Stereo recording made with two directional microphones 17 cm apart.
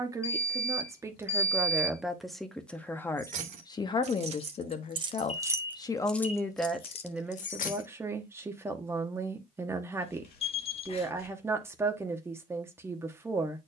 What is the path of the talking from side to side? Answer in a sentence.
In this clip you hear the talking move from right to left and back again.